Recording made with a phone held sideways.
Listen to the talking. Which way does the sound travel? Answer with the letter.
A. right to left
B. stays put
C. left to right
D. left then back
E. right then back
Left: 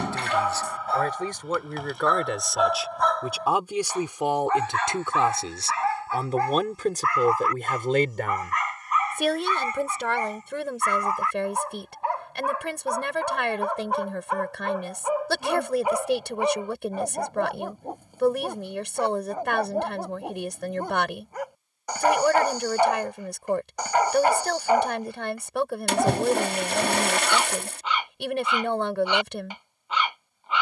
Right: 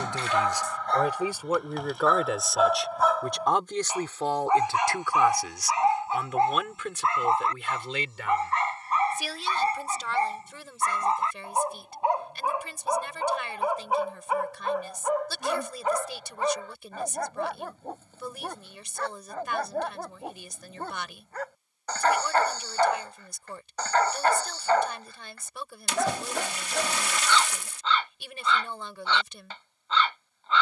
A.